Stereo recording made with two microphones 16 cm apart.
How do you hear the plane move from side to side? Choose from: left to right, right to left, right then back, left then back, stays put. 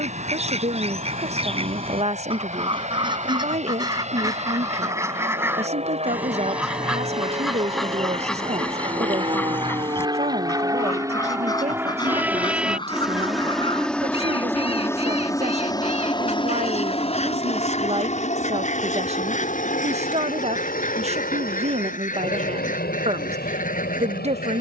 right to left.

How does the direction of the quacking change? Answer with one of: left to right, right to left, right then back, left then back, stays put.
right to left.